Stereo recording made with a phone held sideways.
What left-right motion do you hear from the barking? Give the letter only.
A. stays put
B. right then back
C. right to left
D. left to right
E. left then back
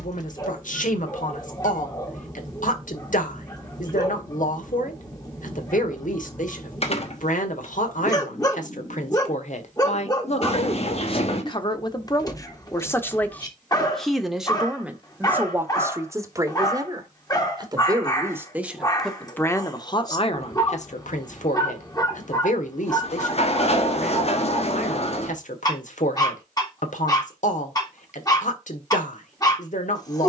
A.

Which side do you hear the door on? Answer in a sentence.
You can hear the door on the left.